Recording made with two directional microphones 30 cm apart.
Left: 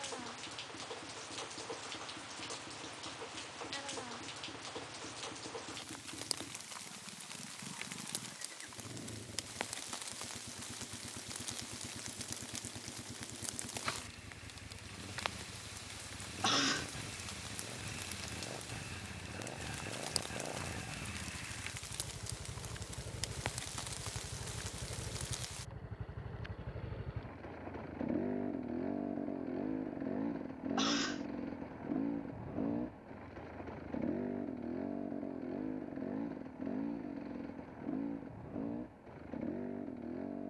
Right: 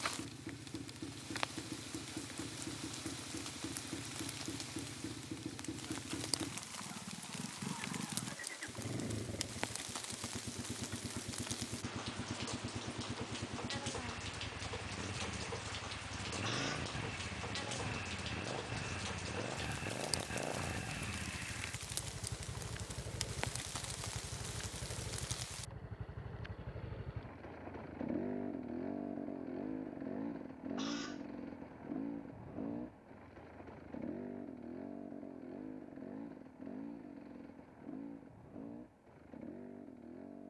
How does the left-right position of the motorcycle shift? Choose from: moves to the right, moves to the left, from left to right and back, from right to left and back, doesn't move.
moves to the left.